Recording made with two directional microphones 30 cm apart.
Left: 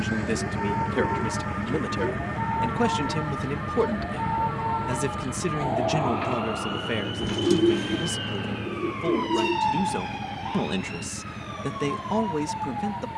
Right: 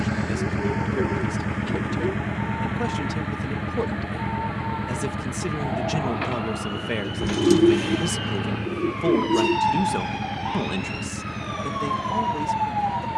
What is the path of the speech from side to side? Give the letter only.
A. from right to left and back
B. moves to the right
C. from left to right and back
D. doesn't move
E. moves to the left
C.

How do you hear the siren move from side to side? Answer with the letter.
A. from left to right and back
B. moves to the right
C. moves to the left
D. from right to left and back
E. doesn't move
B.